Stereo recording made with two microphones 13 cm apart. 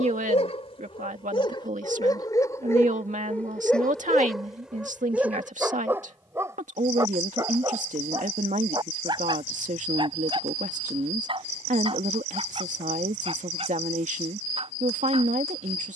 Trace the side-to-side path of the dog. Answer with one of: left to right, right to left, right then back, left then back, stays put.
left to right.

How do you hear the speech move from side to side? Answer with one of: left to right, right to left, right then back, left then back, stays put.
stays put.